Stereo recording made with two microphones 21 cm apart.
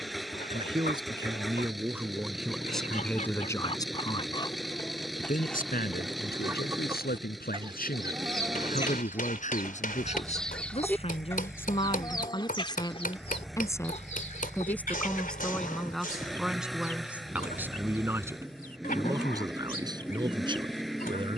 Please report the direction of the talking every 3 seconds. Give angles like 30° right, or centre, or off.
10° right, 30° left, 50° left, 30° left, 20° left, centre, 20° right.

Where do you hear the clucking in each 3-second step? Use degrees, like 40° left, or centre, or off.
40° left, 20° left, 20° right, centre, 30° left, 40° left, 40° left.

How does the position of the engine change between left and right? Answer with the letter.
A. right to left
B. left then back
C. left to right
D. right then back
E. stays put
E.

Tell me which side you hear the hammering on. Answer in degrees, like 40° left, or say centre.
40° left.